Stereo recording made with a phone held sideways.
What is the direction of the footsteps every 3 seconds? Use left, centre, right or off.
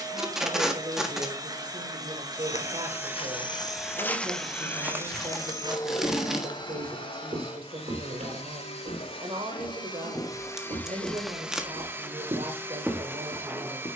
left, centre, right, right, centre.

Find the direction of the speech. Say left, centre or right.
right.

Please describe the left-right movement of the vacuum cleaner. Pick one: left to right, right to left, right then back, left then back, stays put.
left then back.